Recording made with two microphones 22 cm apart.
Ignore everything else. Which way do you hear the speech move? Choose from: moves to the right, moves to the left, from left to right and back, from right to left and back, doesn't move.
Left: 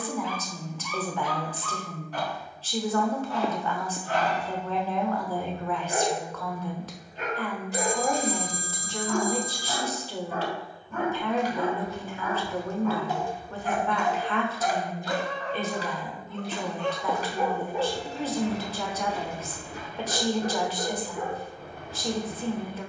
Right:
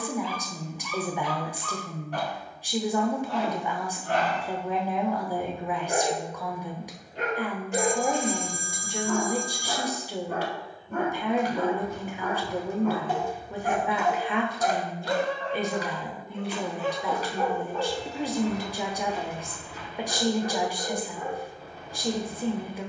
doesn't move.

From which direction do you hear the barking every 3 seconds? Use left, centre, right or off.
right, right, right, right, right, centre, left, left.